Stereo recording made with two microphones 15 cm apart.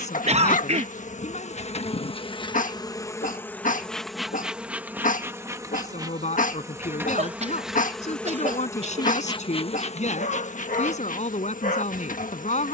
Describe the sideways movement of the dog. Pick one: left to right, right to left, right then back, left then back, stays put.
stays put.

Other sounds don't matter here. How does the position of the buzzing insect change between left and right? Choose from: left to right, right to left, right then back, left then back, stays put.
right then back.